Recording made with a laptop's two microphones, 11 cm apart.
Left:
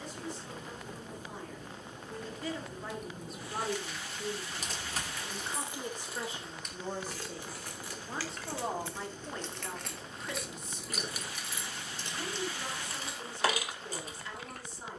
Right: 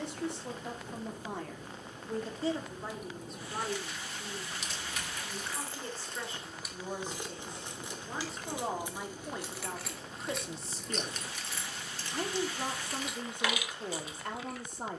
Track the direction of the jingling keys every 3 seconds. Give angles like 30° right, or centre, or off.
off, 30° left, 10° right, centre, 40° left.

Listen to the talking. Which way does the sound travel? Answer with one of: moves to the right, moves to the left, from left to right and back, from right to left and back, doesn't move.
from right to left and back.